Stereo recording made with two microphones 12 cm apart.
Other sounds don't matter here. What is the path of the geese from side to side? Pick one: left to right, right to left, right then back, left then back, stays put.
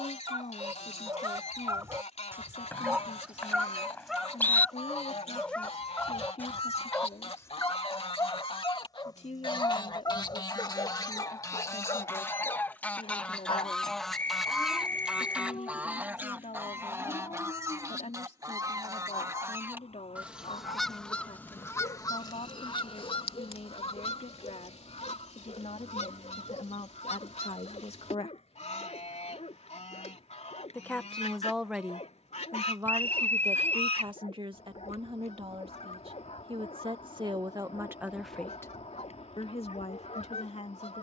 right then back.